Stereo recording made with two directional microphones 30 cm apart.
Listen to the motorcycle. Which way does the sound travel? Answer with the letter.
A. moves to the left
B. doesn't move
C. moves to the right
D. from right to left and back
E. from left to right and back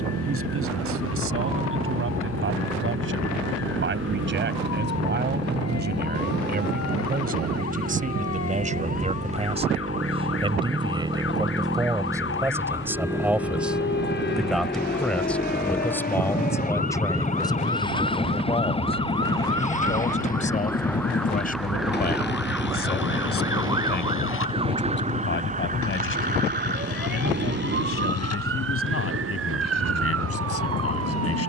A.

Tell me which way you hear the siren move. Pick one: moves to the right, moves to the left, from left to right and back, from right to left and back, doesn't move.
moves to the right.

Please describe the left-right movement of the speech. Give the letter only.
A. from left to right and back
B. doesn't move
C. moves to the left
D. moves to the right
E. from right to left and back
C.